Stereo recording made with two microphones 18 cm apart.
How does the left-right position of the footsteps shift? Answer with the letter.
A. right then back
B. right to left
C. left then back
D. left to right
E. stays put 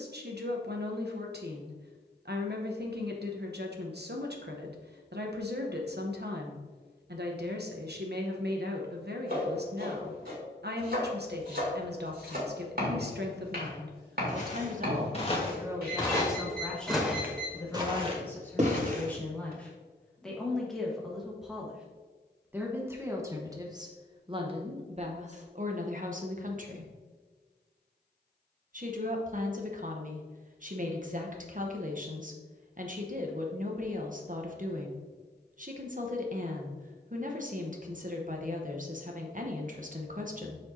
D.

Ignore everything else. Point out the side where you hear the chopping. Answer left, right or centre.
right.